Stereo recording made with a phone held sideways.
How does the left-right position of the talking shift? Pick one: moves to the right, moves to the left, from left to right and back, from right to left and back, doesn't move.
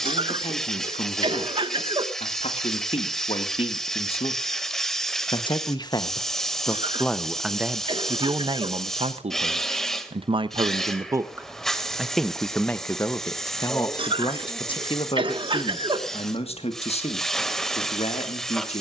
from left to right and back.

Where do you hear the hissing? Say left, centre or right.
centre.